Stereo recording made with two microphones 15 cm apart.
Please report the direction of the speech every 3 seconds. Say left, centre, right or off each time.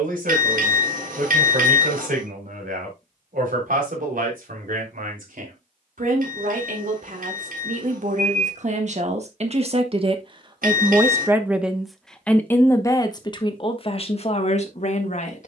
right, right, right, right, left.